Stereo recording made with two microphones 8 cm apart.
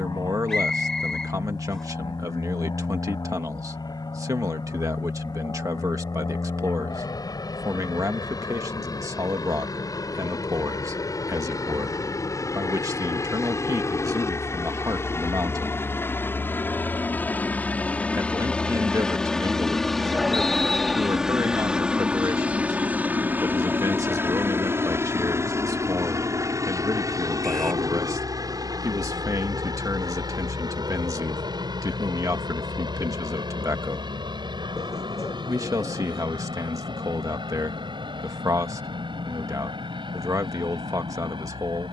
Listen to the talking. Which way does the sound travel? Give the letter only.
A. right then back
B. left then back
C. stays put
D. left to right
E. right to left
C.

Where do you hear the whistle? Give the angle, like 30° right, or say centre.
10° left.